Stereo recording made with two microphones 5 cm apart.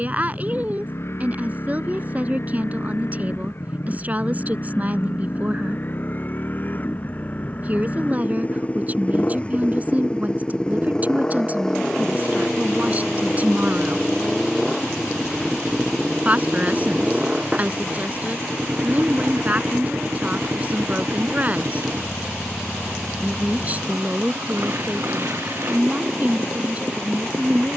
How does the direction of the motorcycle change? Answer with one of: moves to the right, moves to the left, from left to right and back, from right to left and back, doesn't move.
moves to the right.